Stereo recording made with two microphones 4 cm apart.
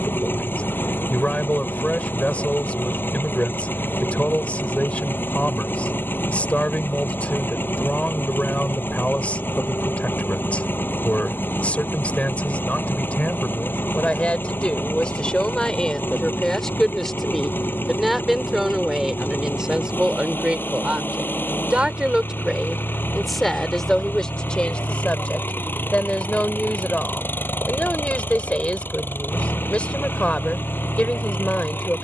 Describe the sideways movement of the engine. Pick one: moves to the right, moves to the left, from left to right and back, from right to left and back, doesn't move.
doesn't move.